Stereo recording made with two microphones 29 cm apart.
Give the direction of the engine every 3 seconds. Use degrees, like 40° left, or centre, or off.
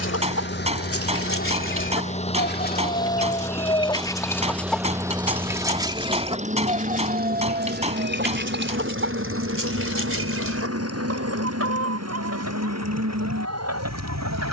30° left, centre, 30° right, 50° right, 60° right.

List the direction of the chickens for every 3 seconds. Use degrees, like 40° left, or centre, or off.
50° left, 10° left, 30° right, 50° right, 60° right.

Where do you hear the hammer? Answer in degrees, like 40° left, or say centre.
20° right.